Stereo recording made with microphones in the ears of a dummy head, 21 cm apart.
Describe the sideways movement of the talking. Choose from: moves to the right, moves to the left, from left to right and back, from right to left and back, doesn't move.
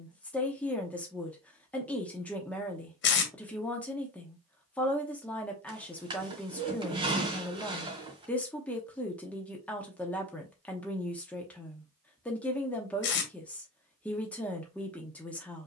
doesn't move.